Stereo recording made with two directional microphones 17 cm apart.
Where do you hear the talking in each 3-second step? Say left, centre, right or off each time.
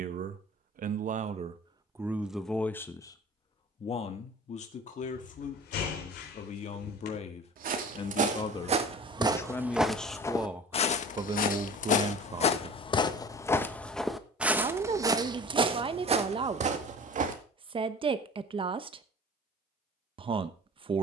right, left, left, centre, right, right, right.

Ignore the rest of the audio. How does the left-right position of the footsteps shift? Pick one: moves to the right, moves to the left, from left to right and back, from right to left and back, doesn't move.
from right to left and back.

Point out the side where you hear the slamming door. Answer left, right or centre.
left.